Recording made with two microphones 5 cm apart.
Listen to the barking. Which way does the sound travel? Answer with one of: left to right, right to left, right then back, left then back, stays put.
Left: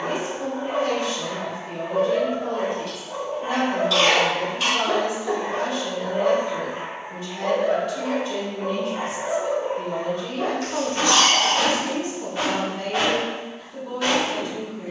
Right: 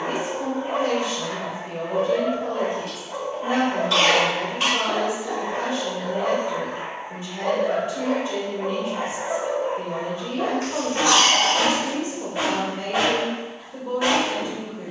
left then back.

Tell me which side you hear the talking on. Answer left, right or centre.
right.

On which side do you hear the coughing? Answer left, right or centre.
right.